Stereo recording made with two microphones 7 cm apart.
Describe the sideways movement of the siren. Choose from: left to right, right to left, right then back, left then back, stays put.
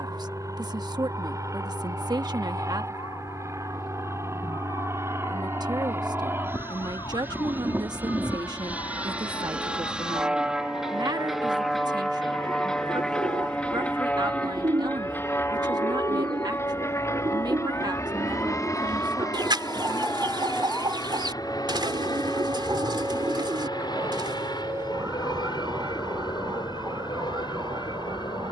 left to right.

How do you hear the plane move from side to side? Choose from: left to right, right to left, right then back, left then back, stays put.
right to left.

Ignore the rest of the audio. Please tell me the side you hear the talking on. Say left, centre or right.
right.